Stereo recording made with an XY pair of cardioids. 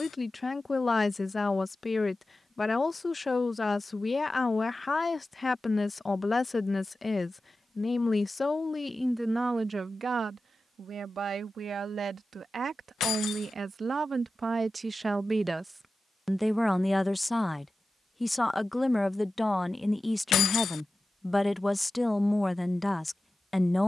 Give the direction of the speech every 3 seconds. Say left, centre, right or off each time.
left, left, left, right, right, centre, centre, centre.